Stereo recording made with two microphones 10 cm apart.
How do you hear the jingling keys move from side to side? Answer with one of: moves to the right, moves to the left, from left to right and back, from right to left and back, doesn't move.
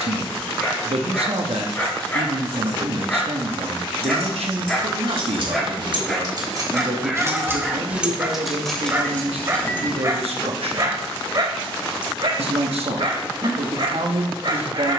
moves to the left.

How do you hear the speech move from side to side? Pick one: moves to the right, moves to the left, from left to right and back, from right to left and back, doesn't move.
doesn't move.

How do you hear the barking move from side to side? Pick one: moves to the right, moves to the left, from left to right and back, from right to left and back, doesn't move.
moves to the right.